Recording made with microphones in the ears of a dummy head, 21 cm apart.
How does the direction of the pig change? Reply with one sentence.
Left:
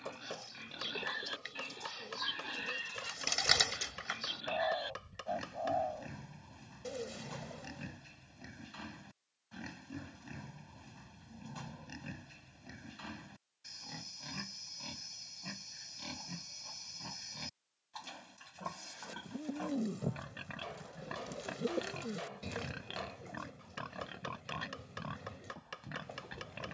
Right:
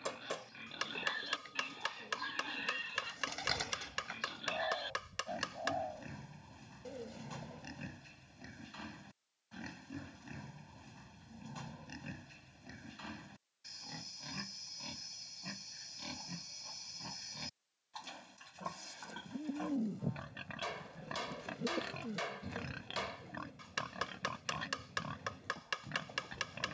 In this clip you hear the pig stay in one place.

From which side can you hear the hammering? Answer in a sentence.
You can hear the hammering on the right.